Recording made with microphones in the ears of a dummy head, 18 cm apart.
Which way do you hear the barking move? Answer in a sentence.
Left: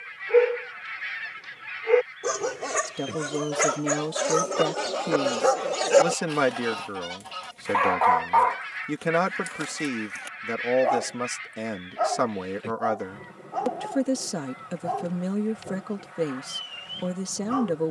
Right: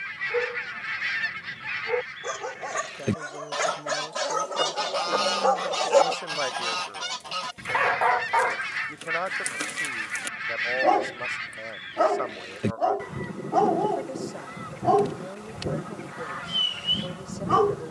In this clip you hear the barking move to the right.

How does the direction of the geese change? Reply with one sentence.
In this clip you hear the geese stay in one place.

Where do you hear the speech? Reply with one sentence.
You can hear the speech on the left.